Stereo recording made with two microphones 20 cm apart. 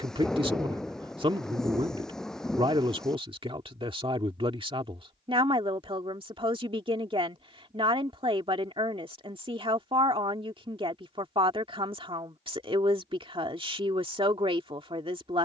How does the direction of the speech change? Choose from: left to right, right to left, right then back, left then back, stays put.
stays put.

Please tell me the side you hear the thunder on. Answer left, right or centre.
centre.